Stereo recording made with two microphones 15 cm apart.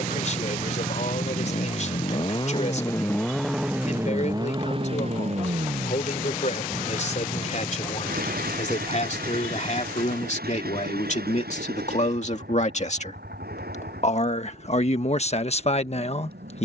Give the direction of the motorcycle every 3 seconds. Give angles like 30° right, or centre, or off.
40° left, 20° right, 60° right, 70° right, 80° right, 80° right.